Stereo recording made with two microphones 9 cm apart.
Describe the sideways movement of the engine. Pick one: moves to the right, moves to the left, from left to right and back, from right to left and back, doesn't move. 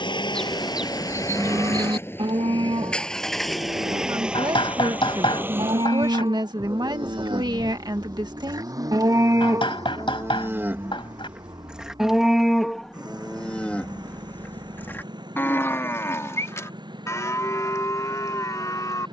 moves to the right.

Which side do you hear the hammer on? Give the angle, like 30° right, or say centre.
70° left.